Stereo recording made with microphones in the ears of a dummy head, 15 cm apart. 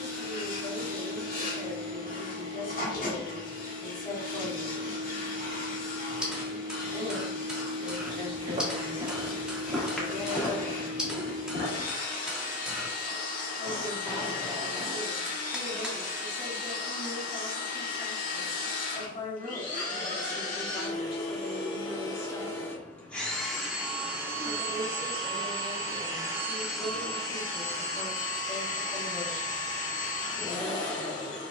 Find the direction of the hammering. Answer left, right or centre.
centre.